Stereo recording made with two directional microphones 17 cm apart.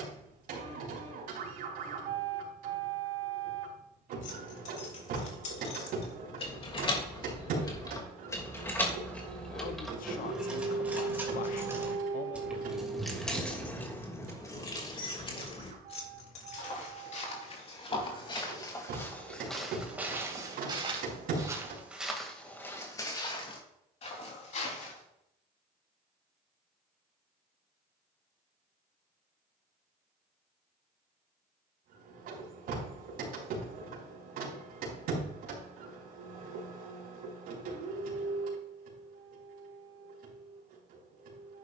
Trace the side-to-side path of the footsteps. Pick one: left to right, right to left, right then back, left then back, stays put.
right then back.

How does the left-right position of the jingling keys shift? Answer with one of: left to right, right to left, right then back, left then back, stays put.
right then back.